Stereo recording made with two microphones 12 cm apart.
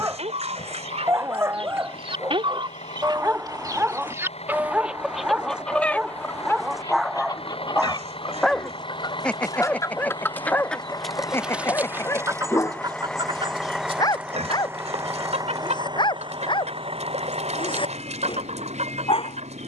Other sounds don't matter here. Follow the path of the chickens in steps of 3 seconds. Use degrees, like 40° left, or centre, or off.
50° right, 10° right, 30° left, 10° left, 40° right, 60° right, 60° right.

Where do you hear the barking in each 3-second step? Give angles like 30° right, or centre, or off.
20° right, 10° right, centre, 10° left, 30° left, 40° left, 50° left.